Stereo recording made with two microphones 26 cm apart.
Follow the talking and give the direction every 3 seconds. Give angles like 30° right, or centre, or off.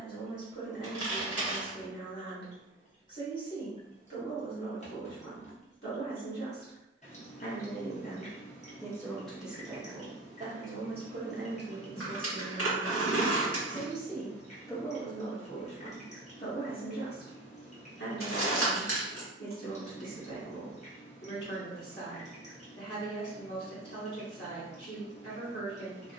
50° left, 50° left, 30° left, 30° right, 10° right, 30° left, 50° left, 50° left, 50° left.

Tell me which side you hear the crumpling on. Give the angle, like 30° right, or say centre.
60° left.